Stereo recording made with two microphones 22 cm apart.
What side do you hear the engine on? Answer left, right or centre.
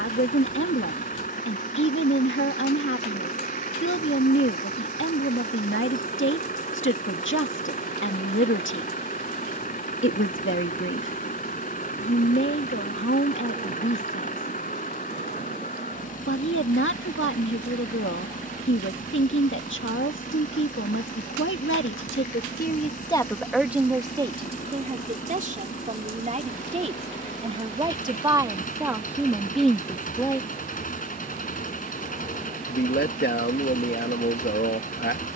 left.